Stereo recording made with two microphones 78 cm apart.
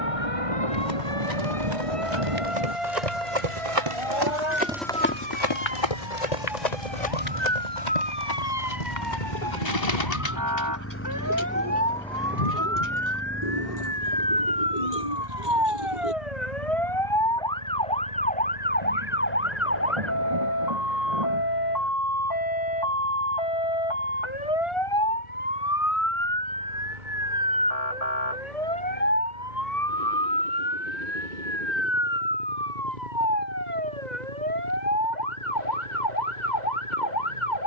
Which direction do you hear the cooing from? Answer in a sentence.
You can hear the cooing on the left.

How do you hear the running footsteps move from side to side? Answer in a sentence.
You can hear the running footsteps move from right to left.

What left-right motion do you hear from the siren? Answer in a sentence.
In this clip you hear the siren travel towards the left.